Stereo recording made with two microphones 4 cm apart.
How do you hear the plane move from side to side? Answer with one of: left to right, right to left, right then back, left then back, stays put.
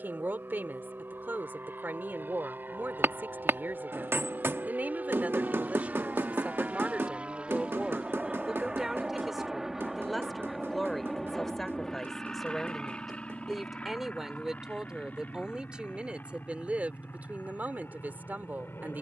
right to left.